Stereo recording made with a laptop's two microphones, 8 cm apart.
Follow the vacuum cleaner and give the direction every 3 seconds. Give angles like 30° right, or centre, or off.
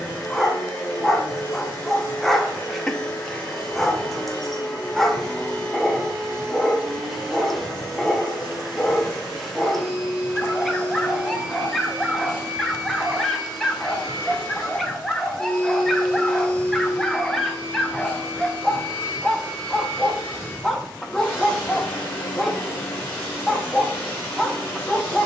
20° left, 20° left, centre, 10° right, centre, 20° left, 20° left, 20° left, 20° left.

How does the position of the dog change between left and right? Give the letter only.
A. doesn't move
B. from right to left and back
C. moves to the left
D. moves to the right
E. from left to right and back
A.